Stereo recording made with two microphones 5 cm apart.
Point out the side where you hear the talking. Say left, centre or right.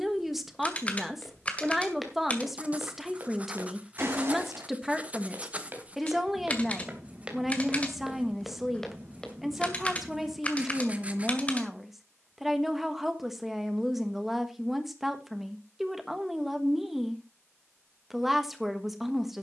centre.